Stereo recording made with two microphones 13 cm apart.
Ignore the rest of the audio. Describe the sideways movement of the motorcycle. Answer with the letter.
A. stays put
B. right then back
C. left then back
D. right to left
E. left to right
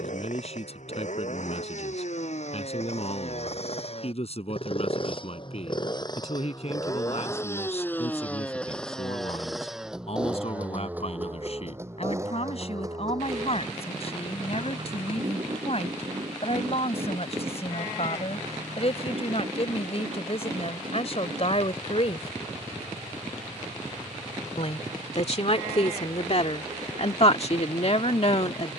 E.